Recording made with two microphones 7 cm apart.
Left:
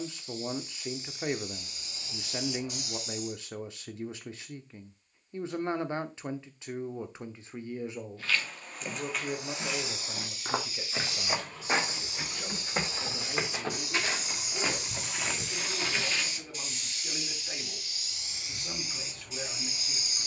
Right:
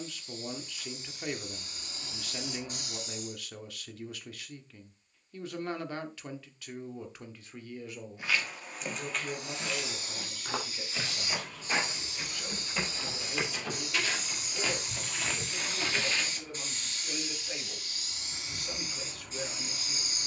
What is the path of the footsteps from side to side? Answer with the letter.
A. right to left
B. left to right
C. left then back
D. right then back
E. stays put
C.